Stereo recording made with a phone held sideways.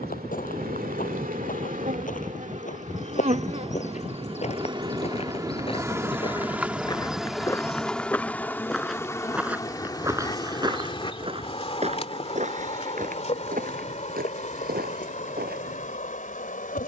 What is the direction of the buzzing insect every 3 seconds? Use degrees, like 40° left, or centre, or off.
50° right, 30° right, centre, 30° left, 40° left, 50° left.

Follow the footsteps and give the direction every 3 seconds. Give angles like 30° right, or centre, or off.
50° left, 40° left, 20° left, 20° right, 50° right, 70° right.